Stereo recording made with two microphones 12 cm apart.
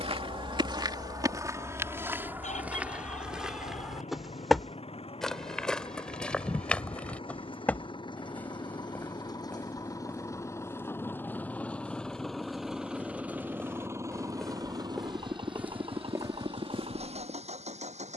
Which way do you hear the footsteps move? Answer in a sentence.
You can hear the footsteps move from right to left and back again.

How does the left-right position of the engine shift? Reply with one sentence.
You can hear the engine move from left to right.